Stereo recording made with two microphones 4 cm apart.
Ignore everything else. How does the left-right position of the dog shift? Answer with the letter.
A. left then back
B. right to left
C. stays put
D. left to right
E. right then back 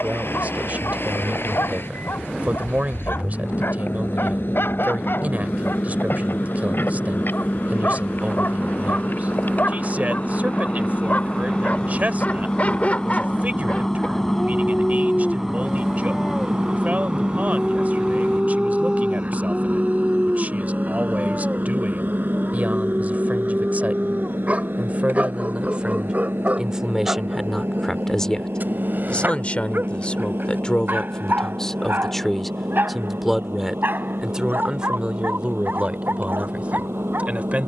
D.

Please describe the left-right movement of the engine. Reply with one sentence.
You can hear the engine travel towards the right.